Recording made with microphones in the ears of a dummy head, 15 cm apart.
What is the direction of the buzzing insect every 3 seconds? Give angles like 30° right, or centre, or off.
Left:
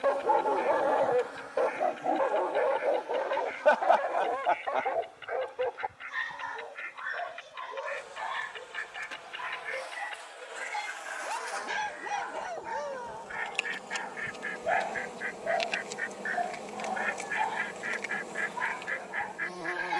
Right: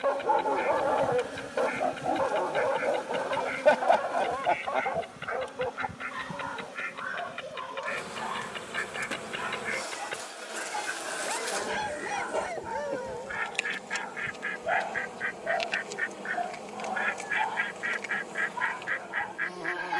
30° right, 70° right, 70° right, 50° right, 10° right, centre, centre.